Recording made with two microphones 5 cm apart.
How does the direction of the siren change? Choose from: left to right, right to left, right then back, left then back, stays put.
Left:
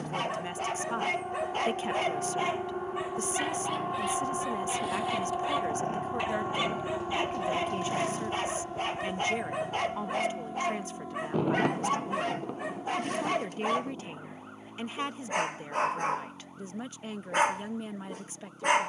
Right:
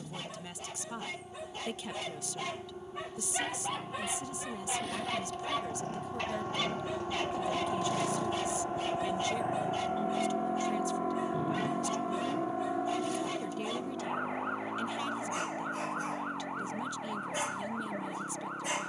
left to right.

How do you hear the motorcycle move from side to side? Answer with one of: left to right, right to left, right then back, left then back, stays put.
left to right.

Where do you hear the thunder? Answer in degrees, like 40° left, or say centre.
70° left.